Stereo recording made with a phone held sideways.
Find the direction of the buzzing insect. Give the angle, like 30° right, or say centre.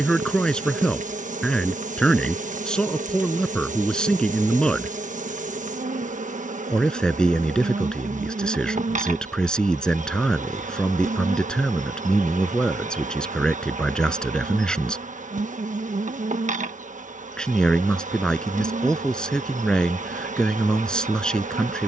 60° right.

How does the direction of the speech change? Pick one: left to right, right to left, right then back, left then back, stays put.
stays put.